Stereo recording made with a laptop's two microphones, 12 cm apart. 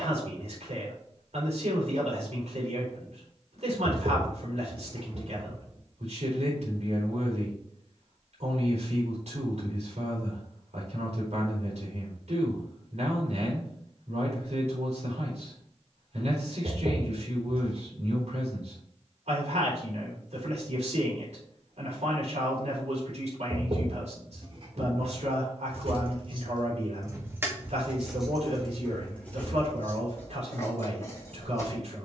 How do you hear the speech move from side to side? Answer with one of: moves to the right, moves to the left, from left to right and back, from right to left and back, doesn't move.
doesn't move.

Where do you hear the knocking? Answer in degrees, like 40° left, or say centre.
50° right.